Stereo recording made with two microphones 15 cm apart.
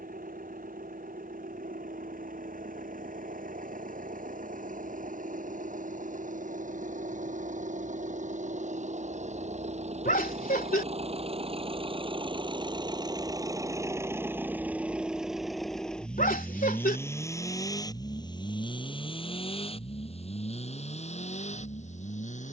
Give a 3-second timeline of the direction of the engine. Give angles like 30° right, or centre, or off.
70° right, 70° right, 60° right, 50° right, 20° right, 10° left, 40° left, 50° left.